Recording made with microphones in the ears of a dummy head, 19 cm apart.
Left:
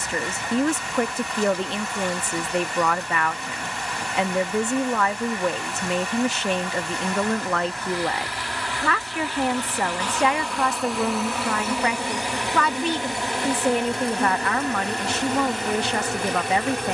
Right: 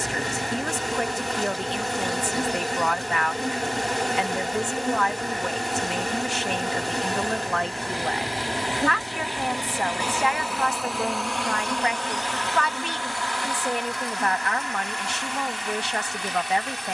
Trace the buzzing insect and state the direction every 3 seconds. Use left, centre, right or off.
right, right, right, centre, left, left.